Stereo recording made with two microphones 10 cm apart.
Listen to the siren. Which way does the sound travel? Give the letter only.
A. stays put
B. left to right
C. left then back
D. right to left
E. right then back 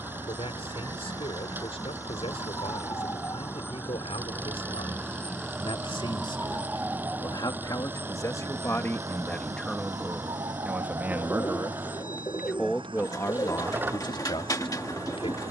B.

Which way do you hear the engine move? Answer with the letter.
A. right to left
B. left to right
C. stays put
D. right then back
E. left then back
C.